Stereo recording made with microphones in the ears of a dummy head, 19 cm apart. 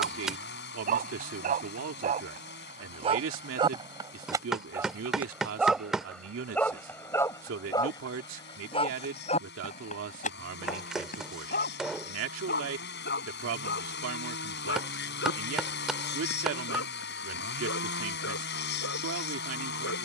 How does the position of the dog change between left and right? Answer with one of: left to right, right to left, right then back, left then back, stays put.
right to left.